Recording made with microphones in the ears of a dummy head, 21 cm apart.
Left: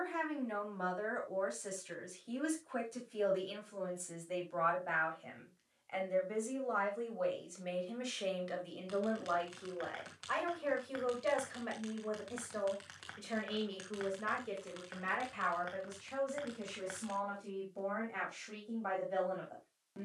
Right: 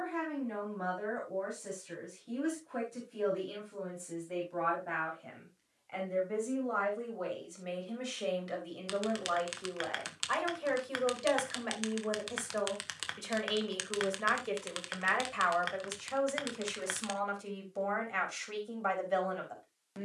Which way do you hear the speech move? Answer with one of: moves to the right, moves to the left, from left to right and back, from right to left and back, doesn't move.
moves to the right.